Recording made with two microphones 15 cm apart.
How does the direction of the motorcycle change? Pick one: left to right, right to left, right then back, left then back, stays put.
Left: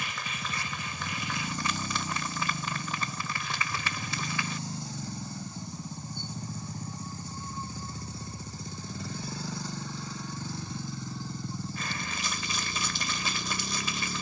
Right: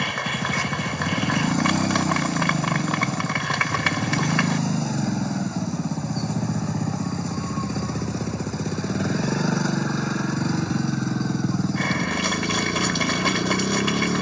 stays put.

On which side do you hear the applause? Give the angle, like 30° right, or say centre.
60° right.